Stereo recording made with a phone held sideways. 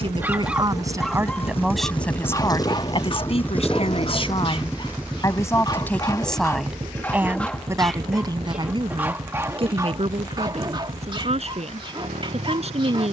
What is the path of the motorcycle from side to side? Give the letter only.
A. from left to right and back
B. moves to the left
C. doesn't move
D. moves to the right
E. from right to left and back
D.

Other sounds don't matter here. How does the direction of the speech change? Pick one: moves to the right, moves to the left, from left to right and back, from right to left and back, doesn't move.
from right to left and back.